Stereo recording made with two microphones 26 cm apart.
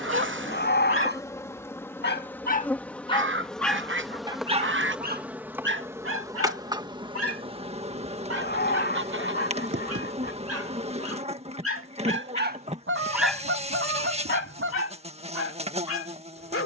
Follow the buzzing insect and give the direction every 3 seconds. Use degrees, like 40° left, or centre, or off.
10° left, centre, 20° right, 20° right, 20° right, 20° right.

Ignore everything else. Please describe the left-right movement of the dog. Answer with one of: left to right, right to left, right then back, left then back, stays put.
right then back.